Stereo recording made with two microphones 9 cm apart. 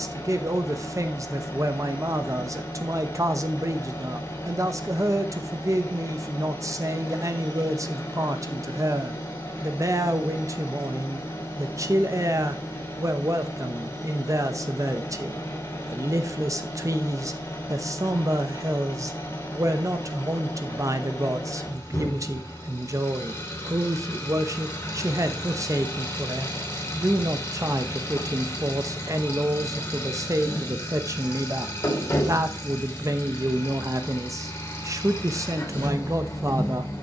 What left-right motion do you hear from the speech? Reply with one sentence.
You can hear the speech stay put.